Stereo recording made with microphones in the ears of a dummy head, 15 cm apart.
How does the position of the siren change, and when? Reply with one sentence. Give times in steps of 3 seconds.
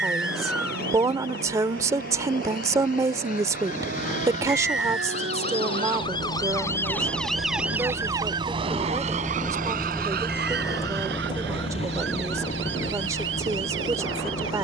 In this clip you hear the siren on the left from 0 s, in the centre from 6 s and on the right from 9 s.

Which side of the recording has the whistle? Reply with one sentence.
You can hear the whistle in the centre.